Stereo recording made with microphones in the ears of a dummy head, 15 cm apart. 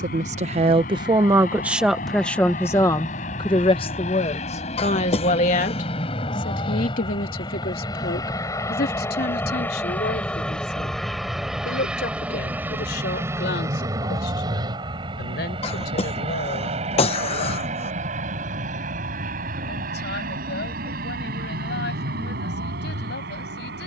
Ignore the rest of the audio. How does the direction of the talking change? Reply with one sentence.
In this clip you hear the talking move to the left.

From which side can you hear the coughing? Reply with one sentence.
In this clip you hear the coughing on the left.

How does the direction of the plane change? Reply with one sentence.
In this clip you hear the plane travel towards the right.